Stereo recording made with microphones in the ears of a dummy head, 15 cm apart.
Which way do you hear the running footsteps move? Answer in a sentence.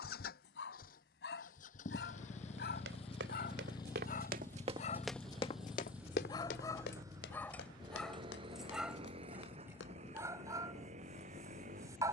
You can hear the running footsteps move from right to left.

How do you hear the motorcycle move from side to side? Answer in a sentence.
In this clip you hear the motorcycle travel towards the right.